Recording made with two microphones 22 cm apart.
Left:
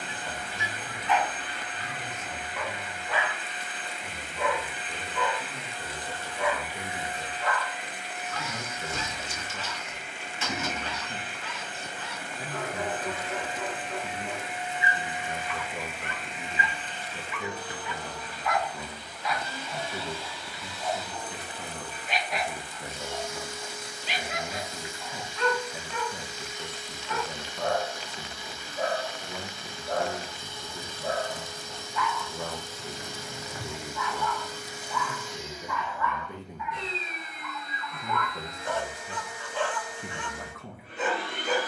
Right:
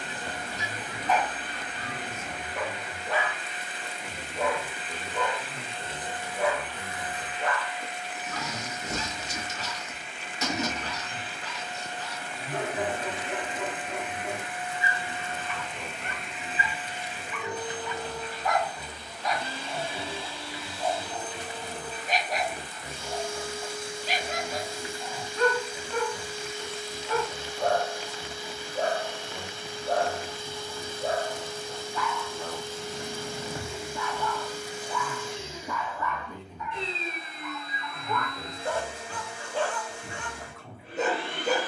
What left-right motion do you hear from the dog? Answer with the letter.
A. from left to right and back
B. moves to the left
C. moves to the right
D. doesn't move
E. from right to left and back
D.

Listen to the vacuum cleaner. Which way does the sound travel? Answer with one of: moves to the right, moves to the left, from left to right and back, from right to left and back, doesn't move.
from right to left and back.